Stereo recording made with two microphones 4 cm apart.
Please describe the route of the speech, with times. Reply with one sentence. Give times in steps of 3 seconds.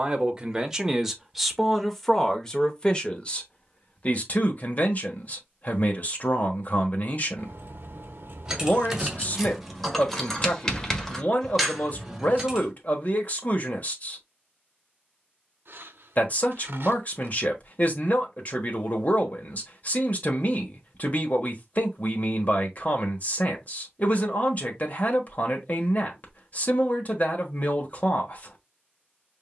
In this clip you hear the speech in the centre from 0 s and on the left from 3 s.